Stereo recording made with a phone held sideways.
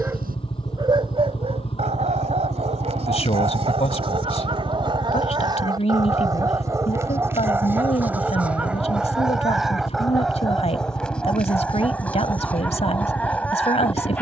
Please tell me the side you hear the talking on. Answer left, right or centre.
left.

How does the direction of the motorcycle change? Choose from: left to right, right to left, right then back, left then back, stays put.
stays put.